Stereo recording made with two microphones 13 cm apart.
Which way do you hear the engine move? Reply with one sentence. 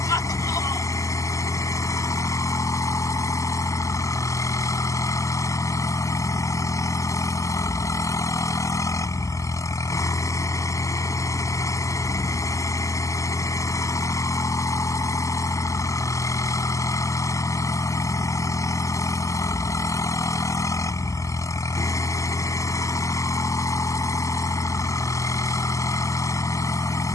In this clip you hear the engine stay in one place.